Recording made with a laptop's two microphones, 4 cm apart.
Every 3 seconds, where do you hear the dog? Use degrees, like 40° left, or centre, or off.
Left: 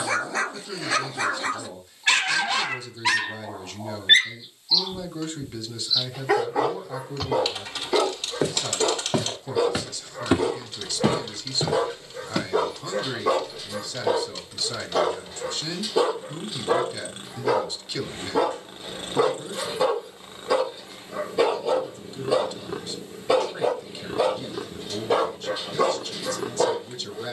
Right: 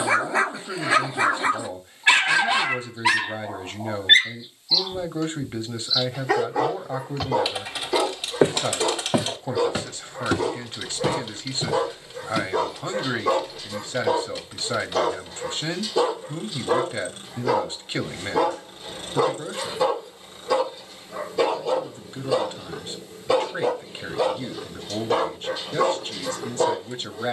20° right, centre, 20° left, 20° left, 20° left, 20° left, 20° left, 20° left, 20° left.